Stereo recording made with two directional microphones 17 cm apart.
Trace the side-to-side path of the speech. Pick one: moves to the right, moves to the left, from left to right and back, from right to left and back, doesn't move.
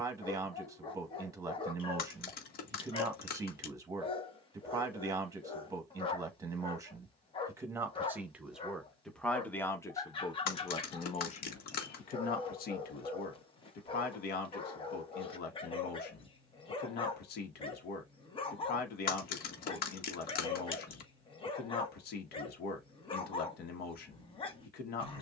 moves to the left.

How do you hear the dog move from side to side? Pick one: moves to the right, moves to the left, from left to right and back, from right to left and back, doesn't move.
doesn't move.